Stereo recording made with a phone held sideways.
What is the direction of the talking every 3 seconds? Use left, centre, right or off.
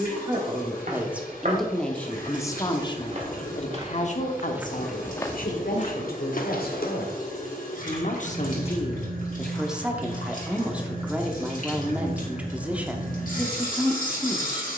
centre, left, left, centre, centre.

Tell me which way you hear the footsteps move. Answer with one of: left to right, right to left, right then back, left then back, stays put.
right to left.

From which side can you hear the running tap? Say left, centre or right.
left.